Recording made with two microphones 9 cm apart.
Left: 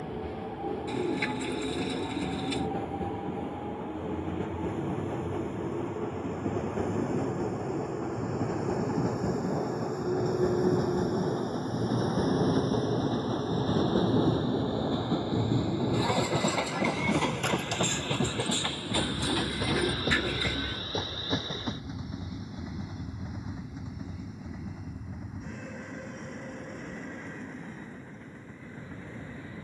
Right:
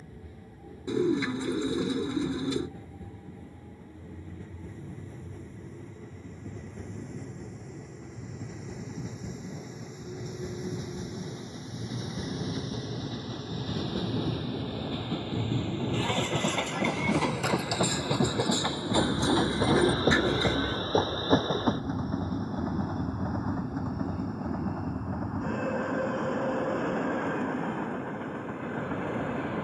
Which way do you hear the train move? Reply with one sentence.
You can hear the train go from the left side to the right.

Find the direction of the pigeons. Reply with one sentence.
You can hear the pigeons on the right.